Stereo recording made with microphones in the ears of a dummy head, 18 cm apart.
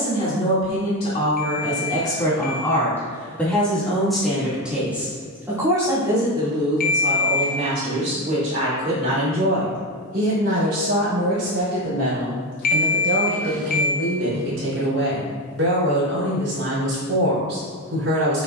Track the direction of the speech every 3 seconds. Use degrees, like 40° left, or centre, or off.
20° left, centre, 30° right, 50° right, 60° right, 60° right.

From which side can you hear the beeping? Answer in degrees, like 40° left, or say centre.
40° left.